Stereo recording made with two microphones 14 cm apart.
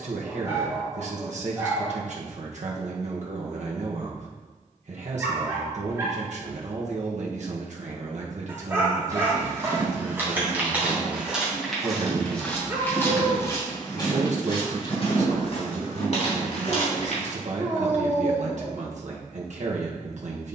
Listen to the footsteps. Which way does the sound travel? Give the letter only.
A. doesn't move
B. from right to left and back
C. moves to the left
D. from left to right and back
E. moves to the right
C.